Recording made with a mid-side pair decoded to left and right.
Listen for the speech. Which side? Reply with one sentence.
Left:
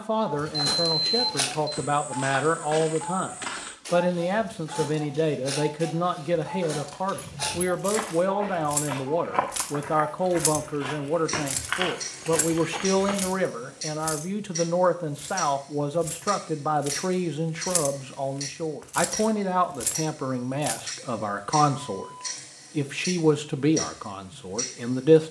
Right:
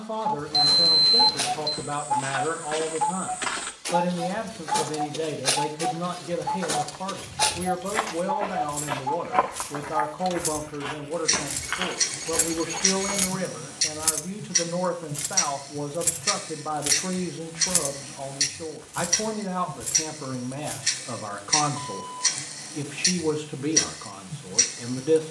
In this clip you hear the speech on the left.